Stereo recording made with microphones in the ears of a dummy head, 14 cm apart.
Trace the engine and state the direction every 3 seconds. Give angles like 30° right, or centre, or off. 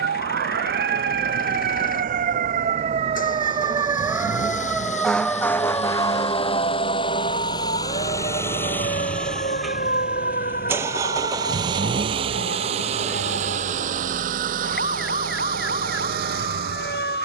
60° left, 50° left, 30° left, 10° right, 50° right, 60° right.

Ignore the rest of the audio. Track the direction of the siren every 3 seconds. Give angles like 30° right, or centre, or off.
60° right, 10° right, 40° left, 50° left, 60° left, 60° left.